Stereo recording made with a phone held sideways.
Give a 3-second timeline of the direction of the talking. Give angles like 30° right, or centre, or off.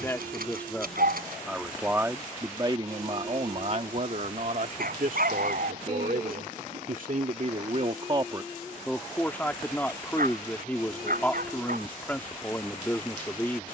10° right, 60° right, 50° right, 10° left, 10° left.